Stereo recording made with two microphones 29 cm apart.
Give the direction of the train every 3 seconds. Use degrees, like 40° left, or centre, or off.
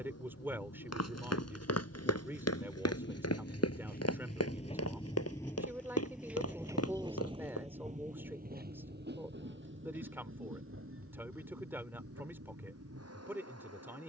60° left, 20° left, 20° right, 50° right, 60° right.